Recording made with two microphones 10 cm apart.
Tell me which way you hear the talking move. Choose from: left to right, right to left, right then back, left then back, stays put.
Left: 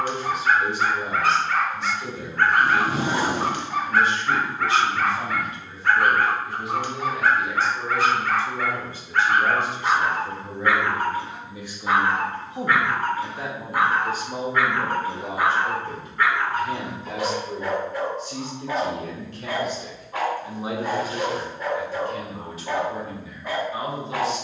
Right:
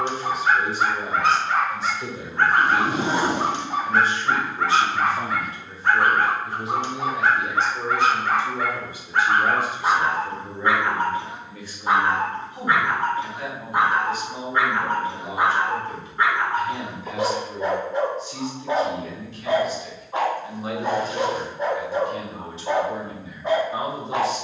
left then back.